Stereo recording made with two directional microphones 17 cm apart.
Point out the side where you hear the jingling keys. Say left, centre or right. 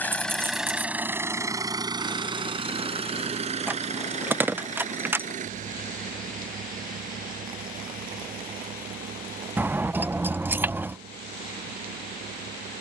centre.